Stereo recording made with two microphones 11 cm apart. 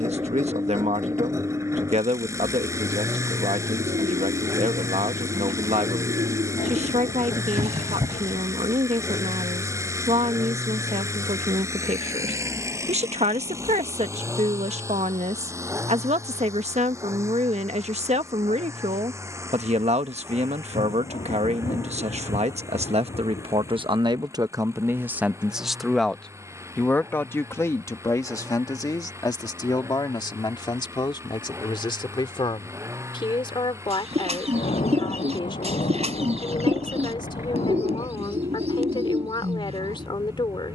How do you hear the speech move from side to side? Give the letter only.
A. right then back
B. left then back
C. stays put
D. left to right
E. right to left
E.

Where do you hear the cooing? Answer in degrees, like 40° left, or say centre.
70° right.